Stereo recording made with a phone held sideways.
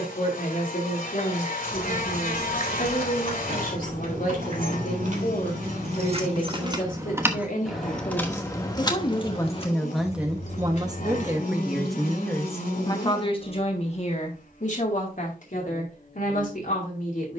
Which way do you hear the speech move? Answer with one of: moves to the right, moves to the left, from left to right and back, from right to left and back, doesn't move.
from left to right and back.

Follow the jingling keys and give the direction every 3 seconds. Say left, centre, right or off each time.
right, right, centre, left, off, off.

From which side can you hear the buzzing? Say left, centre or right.
left.